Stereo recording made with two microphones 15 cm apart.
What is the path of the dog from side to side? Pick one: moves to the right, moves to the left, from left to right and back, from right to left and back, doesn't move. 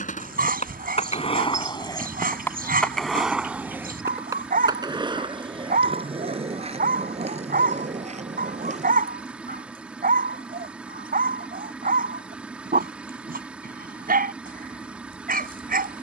doesn't move.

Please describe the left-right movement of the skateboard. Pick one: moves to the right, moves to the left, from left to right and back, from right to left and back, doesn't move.
moves to the right.